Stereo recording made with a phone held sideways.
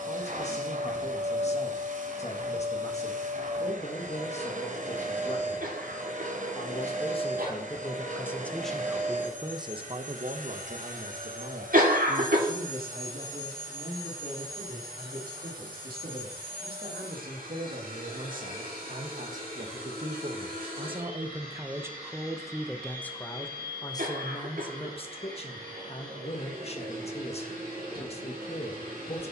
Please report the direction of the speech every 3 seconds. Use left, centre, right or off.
left, left, left, right, right, right, right, centre, left, left.